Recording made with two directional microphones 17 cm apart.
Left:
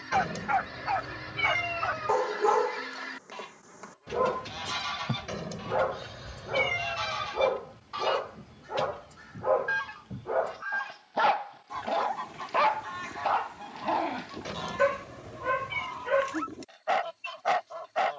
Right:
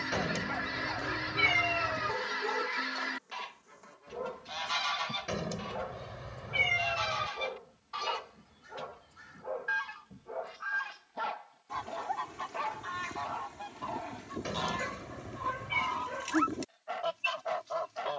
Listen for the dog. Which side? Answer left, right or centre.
left.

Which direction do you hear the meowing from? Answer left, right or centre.
centre.